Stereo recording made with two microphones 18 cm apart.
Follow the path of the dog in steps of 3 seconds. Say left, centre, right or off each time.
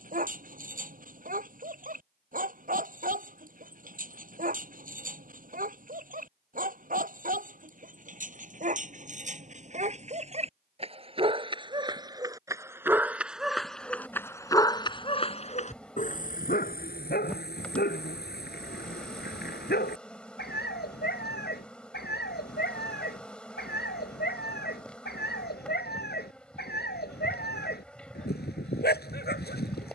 right, right, right, right, centre, left, left, left, left, left.